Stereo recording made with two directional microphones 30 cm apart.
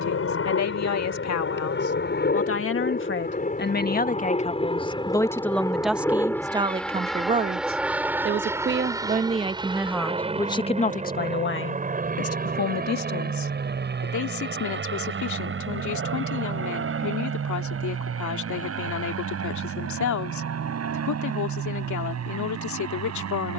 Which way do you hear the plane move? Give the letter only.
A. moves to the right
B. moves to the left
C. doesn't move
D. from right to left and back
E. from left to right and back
A.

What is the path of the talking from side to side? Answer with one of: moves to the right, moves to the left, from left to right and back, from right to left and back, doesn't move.
from left to right and back.